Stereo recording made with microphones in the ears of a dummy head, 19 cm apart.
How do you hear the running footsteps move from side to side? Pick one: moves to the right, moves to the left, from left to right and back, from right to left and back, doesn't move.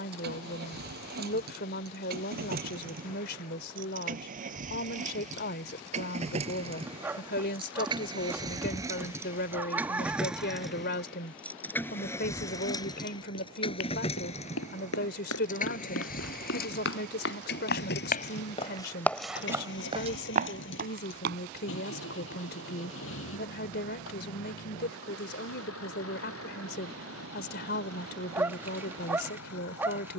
moves to the right.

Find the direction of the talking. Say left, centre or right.
left.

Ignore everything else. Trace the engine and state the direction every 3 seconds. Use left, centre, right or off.
right, right, right, centre, left, left, left, left, left, left.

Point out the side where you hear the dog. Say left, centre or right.
centre.